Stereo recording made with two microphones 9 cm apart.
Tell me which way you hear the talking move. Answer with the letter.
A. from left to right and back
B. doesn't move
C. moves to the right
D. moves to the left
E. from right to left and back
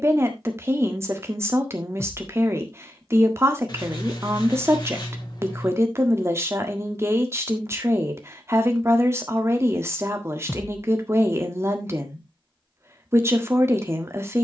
B.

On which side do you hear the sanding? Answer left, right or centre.
left.